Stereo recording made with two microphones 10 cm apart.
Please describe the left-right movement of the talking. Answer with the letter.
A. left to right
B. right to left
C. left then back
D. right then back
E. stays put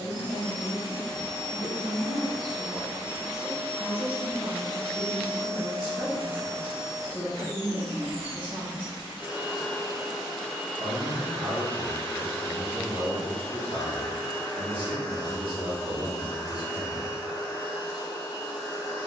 E.